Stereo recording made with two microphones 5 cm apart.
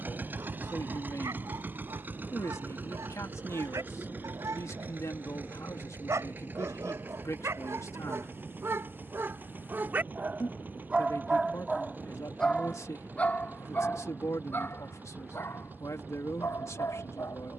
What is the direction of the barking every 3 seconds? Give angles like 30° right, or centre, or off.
80° right, 70° right, 60° right, 20° right, 30° left, 60° left.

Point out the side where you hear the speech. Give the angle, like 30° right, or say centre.
70° left.